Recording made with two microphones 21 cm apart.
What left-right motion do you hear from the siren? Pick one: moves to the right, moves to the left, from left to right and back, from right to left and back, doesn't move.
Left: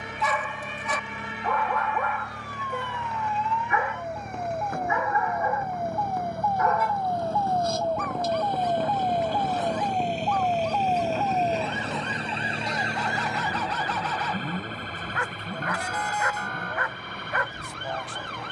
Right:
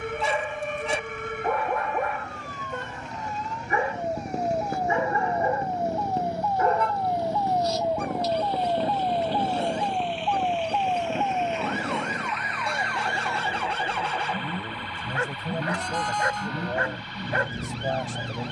moves to the left.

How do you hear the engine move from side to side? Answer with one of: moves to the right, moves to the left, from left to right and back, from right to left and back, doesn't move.
moves to the right.